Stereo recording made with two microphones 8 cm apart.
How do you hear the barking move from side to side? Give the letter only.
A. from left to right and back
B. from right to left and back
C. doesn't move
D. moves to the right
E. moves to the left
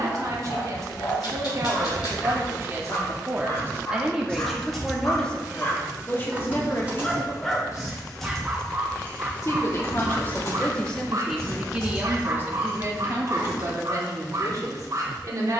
D.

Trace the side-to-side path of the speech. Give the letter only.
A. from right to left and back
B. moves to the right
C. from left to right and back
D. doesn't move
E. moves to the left
A.